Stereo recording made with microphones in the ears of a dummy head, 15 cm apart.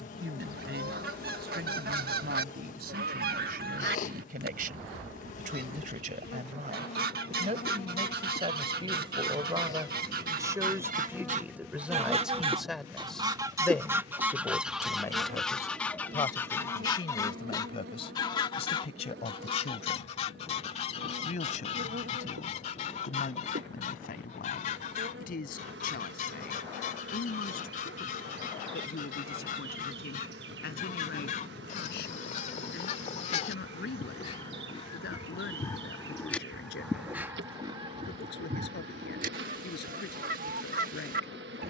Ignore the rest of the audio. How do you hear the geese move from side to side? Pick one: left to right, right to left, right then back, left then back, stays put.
left then back.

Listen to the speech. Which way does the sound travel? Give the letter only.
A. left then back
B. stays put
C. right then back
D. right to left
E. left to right
D.